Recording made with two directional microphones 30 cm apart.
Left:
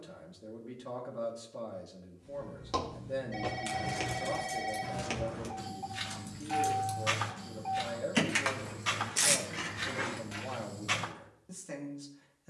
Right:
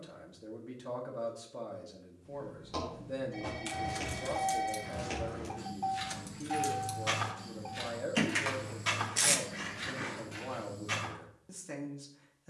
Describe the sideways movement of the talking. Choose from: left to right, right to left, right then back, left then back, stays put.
stays put.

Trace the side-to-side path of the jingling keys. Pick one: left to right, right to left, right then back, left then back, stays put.
right to left.